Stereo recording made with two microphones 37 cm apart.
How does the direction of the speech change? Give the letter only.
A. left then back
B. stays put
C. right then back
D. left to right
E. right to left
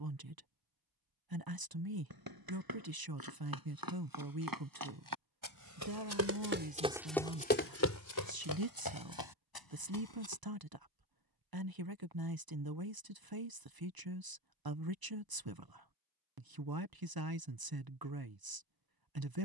B.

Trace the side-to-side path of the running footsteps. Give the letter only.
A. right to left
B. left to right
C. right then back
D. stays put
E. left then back
A.